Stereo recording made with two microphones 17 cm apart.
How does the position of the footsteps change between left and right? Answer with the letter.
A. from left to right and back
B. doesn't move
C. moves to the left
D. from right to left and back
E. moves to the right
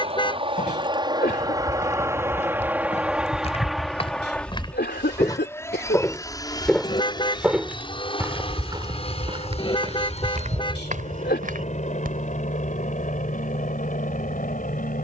E.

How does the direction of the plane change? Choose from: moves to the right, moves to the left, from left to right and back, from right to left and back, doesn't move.
moves to the left.